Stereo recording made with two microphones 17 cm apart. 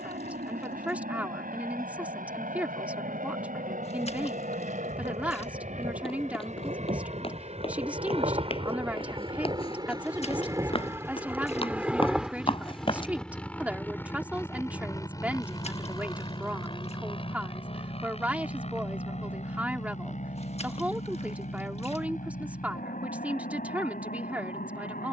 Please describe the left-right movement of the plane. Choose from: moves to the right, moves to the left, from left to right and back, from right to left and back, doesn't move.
moves to the left.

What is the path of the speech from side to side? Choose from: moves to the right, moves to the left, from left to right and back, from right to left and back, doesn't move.
doesn't move.